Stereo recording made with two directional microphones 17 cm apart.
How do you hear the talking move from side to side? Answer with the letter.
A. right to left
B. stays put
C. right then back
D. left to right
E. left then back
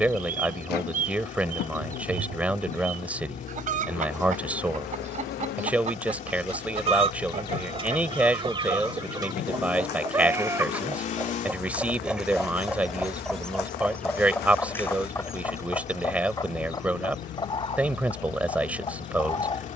B.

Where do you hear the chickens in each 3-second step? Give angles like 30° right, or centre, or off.
50° right, 40° right, 30° right, 10° right, centre, 20° left, 30° left.